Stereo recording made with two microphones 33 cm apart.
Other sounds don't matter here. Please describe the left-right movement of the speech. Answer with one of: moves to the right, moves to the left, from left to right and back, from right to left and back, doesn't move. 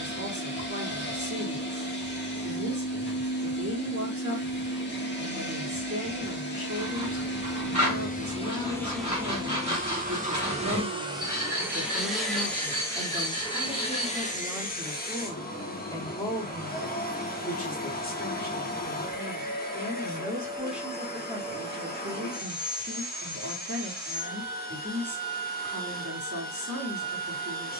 from right to left and back.